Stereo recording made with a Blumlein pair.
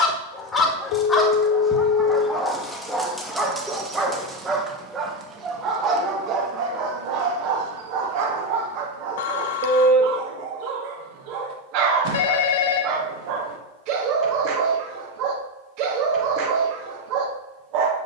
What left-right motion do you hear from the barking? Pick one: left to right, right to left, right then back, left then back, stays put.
left to right.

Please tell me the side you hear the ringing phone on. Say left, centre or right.
left.